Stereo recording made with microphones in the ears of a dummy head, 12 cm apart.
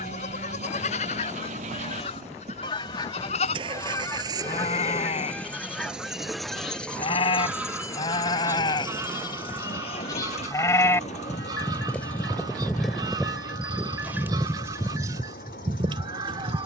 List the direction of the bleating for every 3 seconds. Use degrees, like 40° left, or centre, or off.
50° left, 40° left, 40° left, 20° left, 10° right, 30° right.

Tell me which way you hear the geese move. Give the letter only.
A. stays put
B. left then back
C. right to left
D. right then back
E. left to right
E.